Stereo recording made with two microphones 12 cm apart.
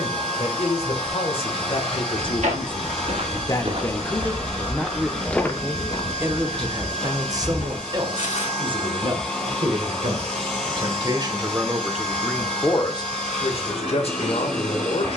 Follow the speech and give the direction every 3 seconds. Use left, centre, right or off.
left, centre, right, right, left.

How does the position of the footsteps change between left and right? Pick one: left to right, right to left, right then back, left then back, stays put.
right to left.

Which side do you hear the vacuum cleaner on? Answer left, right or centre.
centre.